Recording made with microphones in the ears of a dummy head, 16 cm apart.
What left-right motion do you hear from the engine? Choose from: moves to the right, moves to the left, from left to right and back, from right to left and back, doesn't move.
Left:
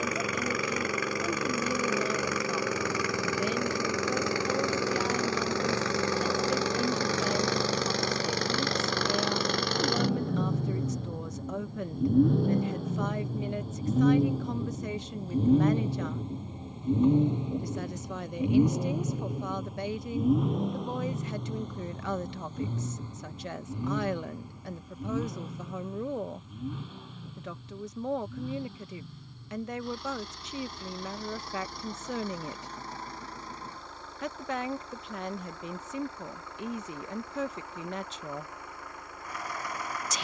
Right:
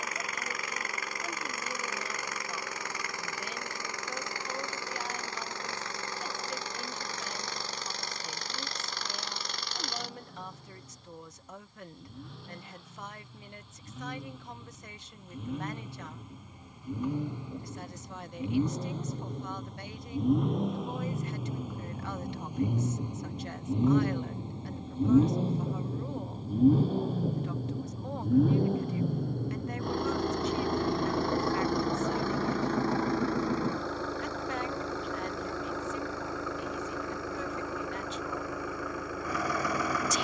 moves to the right.